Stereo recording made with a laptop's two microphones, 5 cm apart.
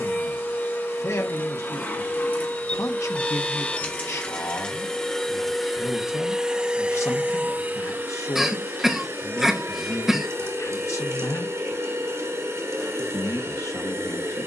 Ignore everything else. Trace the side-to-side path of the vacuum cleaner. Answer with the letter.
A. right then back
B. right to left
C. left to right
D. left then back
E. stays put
C.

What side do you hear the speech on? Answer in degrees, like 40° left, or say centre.
70° left.